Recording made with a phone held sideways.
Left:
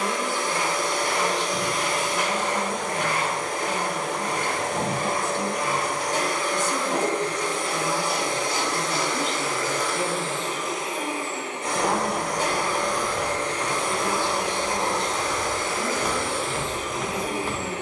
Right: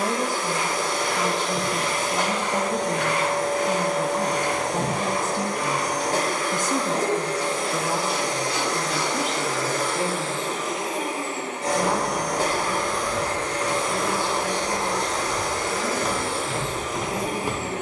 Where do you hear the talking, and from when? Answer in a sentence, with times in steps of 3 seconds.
You can hear the talking on the right from 0 s, in the centre from 9 s and on the left from 12 s.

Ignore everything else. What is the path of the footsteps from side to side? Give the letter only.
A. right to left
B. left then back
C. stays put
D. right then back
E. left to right
E.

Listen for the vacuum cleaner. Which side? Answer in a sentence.
You can hear the vacuum cleaner on the right.